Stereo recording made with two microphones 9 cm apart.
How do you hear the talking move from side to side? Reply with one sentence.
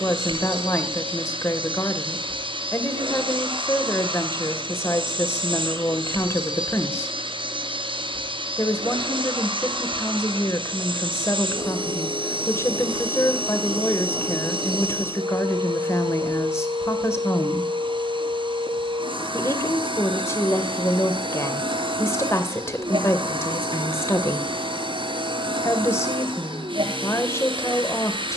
In this clip you hear the talking stay put.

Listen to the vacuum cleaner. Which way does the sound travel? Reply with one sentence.
You can hear the vacuum cleaner stay in one place.